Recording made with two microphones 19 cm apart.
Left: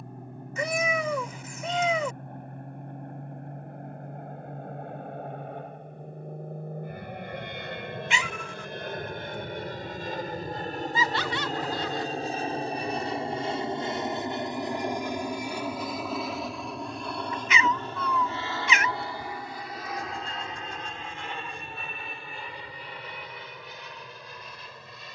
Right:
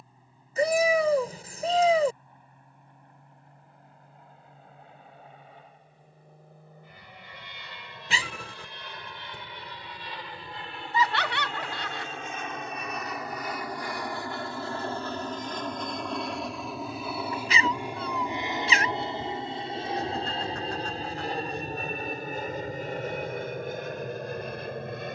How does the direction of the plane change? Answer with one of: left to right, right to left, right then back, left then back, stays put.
left to right.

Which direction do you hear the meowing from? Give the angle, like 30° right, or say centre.
40° right.